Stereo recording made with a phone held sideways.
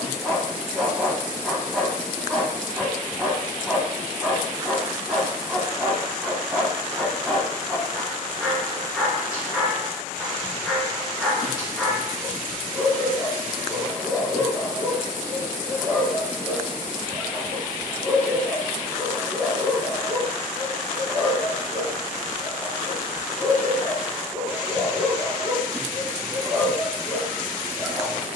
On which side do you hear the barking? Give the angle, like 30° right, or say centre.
10° right.